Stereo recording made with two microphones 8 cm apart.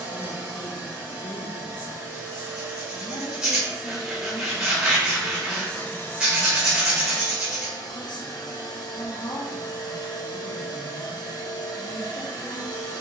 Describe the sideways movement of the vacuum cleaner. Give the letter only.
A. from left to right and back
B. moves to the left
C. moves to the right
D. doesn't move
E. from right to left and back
B.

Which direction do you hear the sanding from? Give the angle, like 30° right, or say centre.
10° right.